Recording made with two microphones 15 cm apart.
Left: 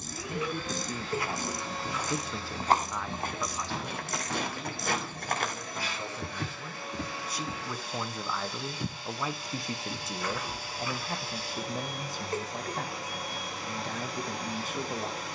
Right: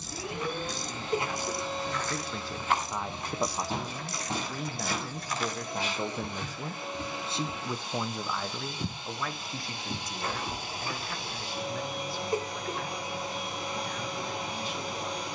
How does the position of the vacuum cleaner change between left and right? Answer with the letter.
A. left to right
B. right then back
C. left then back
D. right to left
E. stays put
E.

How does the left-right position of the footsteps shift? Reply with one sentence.
You can hear the footsteps go left and come back.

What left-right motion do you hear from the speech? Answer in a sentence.
You can hear the speech move from left to right and back again.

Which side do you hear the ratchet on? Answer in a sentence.
In this clip you hear the ratchet on the left.